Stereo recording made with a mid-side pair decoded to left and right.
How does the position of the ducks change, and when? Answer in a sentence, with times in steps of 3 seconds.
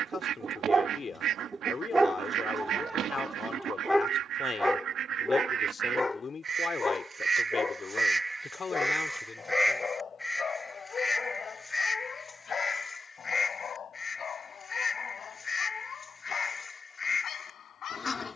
You can hear the ducks on the right from 0 s, in the centre from 9 s and on the left from 12 s.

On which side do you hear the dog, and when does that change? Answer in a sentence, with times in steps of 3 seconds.
You can hear the dog on the right from 0 s, in the centre from 3 s and on the left from 6 s.